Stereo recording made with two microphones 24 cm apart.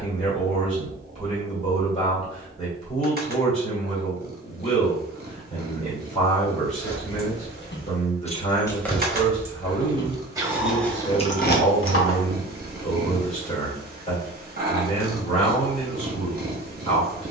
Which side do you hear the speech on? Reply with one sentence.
You can hear the speech on the left.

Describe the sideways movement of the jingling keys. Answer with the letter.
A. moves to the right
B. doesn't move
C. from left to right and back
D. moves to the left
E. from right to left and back
C.